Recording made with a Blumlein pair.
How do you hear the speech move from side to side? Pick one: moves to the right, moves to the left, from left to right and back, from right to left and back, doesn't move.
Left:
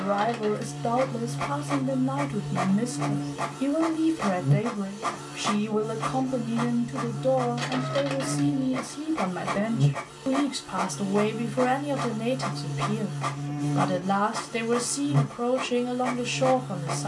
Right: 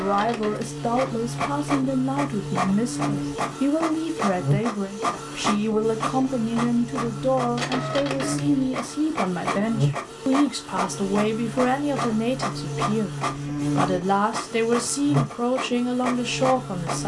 doesn't move.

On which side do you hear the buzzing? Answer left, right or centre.
right.